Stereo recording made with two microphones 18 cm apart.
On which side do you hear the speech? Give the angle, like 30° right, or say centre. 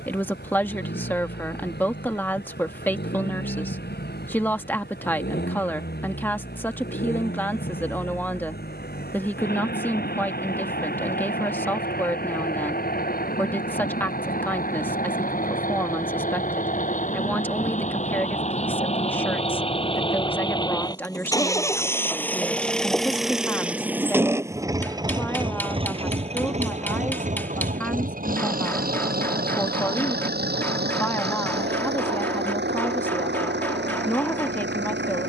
10° left.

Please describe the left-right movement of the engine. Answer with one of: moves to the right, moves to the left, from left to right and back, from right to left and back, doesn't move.
moves to the right.